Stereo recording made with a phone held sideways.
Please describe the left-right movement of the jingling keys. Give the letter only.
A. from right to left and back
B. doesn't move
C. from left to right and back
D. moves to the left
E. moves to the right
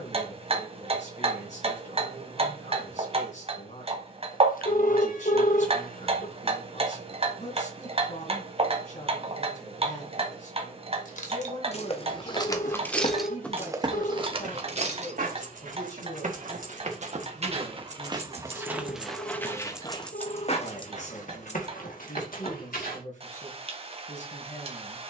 C.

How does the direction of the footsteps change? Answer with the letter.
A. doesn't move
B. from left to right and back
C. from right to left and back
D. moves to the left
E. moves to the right
B.